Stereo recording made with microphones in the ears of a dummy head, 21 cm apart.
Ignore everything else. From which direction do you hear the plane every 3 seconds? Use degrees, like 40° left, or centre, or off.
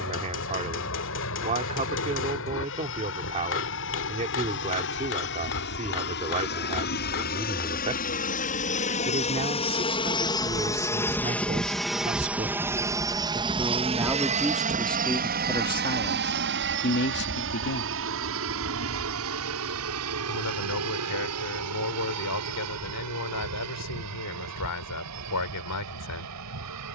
60° left, 60° left, 40° left, 20° left, 20° right, 50° right, 60° right, 70° right, 70° right.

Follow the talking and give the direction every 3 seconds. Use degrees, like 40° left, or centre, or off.
30° right, 30° right, 30° right, 30° right, 10° right, 30° left, 80° left, 80° left, 80° left.